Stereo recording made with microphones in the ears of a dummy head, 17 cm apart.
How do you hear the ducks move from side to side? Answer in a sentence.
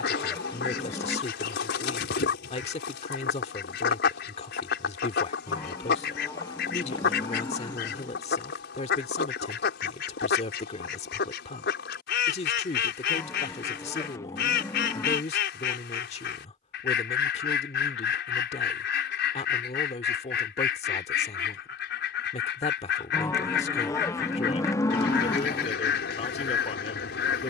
You can hear the ducks stay in one place.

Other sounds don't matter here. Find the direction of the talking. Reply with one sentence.
In this clip you hear the talking on the left.